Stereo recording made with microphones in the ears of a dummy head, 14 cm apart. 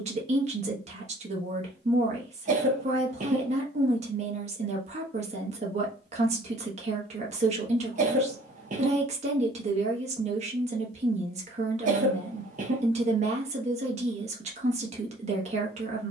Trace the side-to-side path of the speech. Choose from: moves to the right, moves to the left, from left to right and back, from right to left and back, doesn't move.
doesn't move.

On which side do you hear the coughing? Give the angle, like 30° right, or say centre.
50° right.